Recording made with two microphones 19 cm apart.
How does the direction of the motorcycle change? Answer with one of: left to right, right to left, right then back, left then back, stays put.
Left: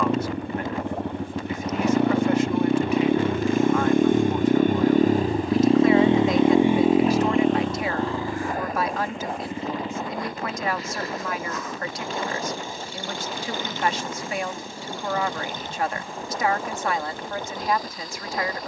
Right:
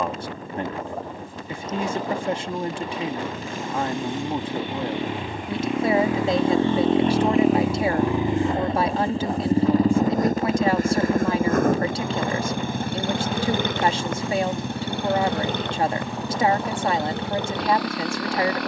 left to right.